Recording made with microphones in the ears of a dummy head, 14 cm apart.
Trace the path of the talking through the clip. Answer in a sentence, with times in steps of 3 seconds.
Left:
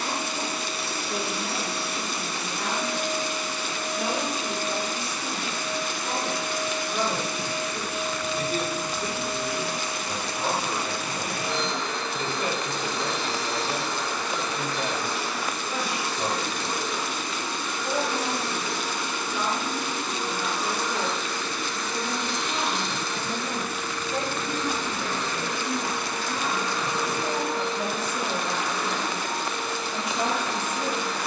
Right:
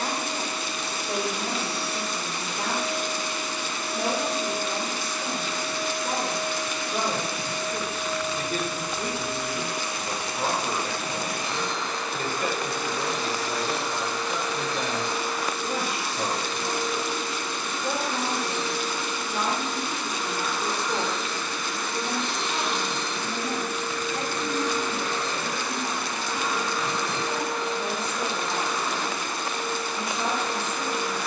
In this clip you hear the talking on the right from 0 s, in the centre from 21 s and on the left from 24 s.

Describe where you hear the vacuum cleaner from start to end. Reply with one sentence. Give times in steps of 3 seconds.
In this clip you hear the vacuum cleaner on the left from 0 s, on the right from 21 s and on the left from 27 s.